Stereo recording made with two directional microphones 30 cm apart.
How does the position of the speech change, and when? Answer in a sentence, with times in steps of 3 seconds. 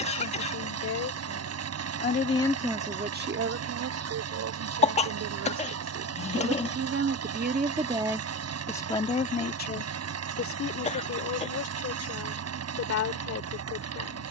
In this clip you hear the speech on the left from 0 s, on the right from 3 s and on the left from 9 s.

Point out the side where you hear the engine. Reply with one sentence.
In this clip you hear the engine on the right.